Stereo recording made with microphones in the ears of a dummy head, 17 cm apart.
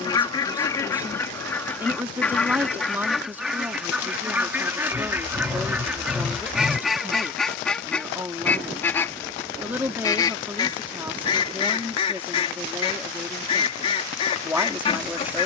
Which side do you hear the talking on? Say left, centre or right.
centre.